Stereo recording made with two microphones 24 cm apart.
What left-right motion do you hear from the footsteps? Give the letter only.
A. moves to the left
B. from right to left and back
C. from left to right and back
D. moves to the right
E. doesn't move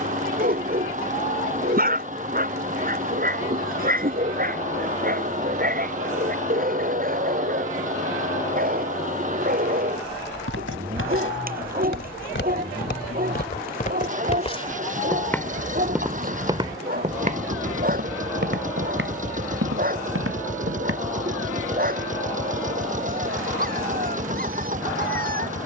D.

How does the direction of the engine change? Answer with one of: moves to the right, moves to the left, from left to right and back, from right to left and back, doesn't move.
doesn't move.